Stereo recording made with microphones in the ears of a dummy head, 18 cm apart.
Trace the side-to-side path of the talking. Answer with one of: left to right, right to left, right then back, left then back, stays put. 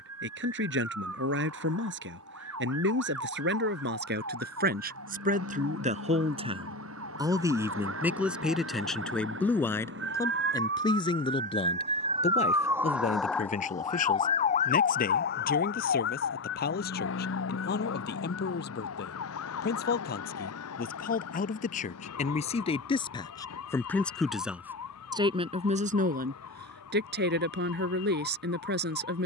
left then back.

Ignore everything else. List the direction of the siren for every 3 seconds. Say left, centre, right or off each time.
right, right, right, right, centre, left, left, left, left, left.